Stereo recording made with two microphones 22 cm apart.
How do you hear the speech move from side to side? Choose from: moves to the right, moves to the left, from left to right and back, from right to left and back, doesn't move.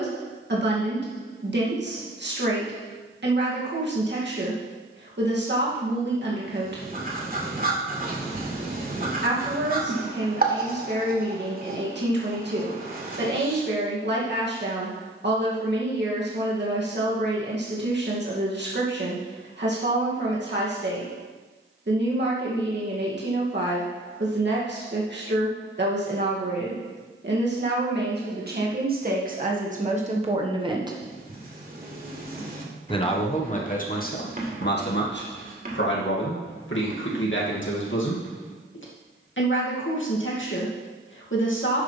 moves to the left.